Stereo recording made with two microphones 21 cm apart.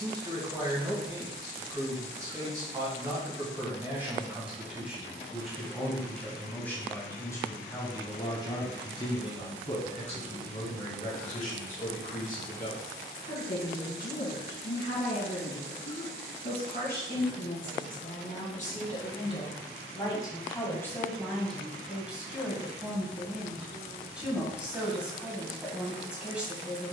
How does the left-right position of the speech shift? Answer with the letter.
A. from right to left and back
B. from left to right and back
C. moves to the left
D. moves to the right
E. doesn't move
A.